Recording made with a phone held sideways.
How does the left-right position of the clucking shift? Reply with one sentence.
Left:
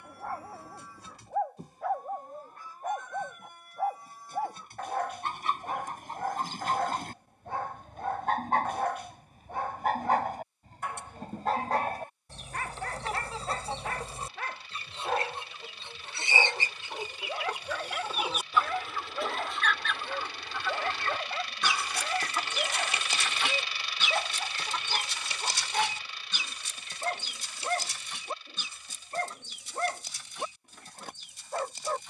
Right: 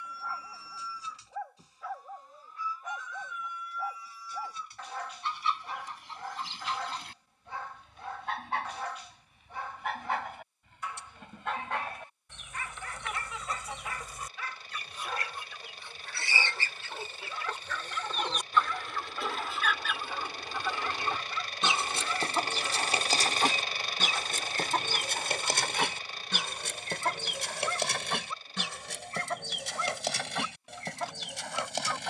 In this clip you hear the clucking travel towards the right.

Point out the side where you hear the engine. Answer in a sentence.
In this clip you hear the engine on the right.